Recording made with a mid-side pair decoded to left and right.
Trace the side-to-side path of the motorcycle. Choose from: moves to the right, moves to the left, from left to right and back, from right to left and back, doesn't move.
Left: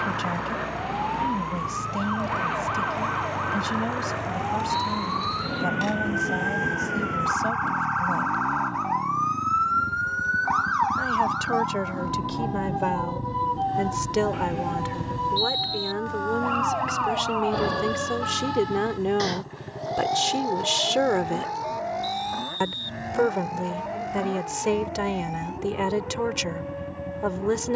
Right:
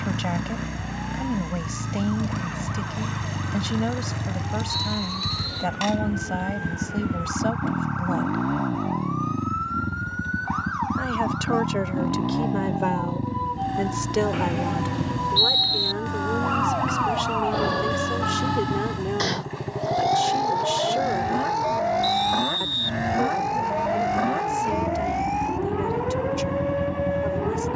doesn't move.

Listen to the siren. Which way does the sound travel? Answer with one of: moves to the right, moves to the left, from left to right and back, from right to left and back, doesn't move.
moves to the right.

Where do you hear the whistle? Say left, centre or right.
right.